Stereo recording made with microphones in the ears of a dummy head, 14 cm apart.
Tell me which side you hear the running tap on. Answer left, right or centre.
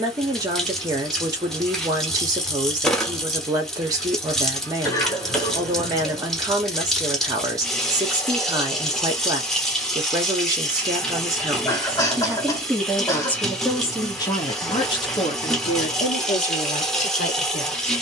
centre.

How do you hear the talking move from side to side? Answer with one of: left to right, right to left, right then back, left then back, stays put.
right to left.